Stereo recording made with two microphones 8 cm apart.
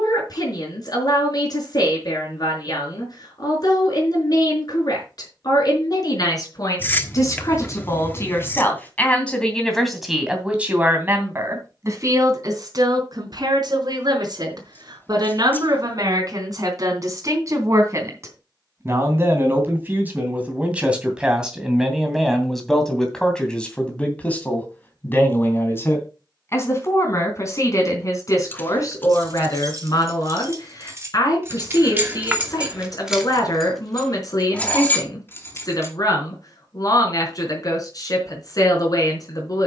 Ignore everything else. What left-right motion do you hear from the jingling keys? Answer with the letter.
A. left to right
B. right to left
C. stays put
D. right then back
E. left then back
B.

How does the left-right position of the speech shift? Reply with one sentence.
You can hear the speech move from left to right and back again.